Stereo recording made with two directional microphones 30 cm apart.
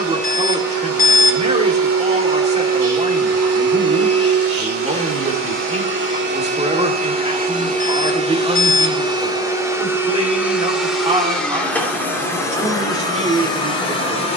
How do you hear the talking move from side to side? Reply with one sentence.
In this clip you hear the talking stay put.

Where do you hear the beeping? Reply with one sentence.
In this clip you hear the beeping on the left.